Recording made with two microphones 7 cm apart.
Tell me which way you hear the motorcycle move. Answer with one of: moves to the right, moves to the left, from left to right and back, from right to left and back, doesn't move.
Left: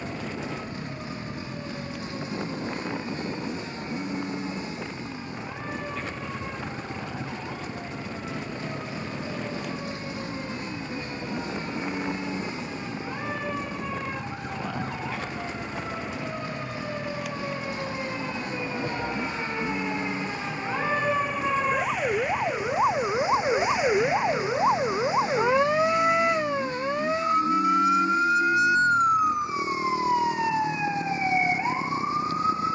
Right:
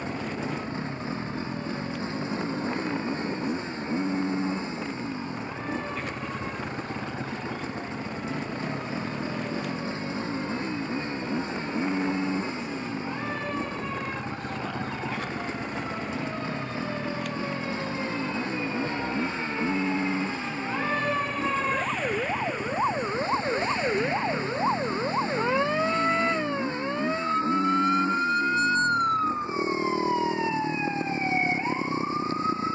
doesn't move.